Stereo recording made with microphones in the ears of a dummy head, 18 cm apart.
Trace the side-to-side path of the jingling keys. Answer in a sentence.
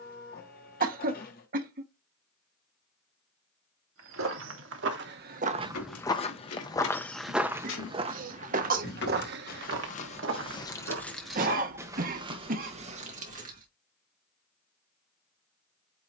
You can hear the jingling keys go from the left side to the right.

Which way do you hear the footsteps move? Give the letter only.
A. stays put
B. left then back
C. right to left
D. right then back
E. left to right
B.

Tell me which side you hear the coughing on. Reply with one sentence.
In this clip you hear the coughing on the right.